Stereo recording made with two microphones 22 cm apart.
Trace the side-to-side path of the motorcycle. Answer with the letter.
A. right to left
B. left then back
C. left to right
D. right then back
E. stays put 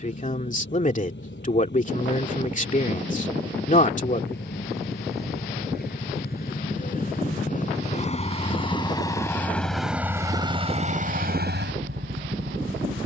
C.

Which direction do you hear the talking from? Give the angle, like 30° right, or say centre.
40° left.